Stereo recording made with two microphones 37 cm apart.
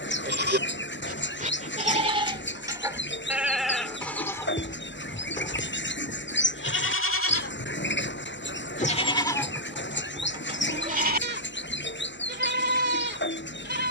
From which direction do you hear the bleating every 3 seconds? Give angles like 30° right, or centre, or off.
20° right, 10° left, 30° left, 10° right, 30° right.